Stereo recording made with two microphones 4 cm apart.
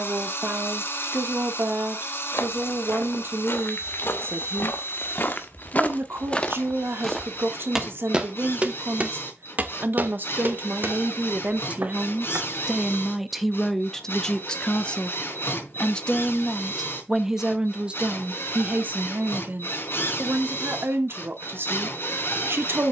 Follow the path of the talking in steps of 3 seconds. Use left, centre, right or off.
right, right, right, right, centre, centre, right, right.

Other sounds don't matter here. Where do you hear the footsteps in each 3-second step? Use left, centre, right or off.
left, left, centre, right, right, off, off, off.